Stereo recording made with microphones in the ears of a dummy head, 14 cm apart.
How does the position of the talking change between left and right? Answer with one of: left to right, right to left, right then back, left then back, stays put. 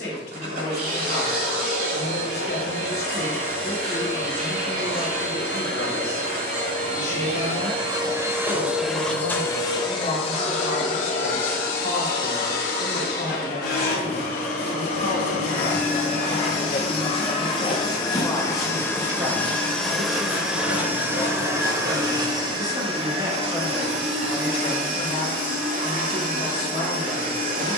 right then back.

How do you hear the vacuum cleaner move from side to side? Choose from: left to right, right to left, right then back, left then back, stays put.
left then back.